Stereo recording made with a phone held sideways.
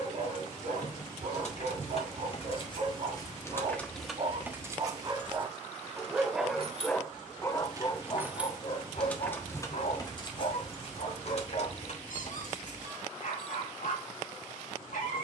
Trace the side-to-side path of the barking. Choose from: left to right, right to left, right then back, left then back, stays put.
right to left.